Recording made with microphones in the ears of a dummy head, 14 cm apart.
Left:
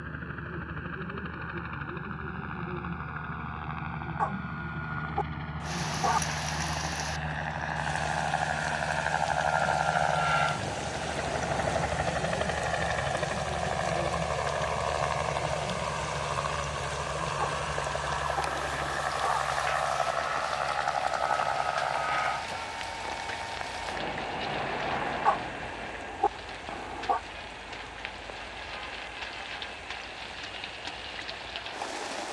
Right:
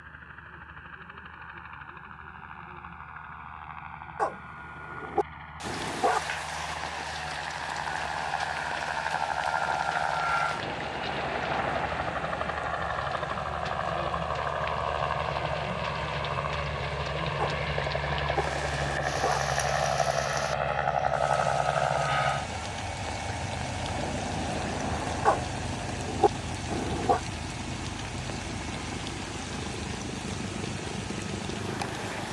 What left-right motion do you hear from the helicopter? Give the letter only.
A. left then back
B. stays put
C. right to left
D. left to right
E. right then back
D.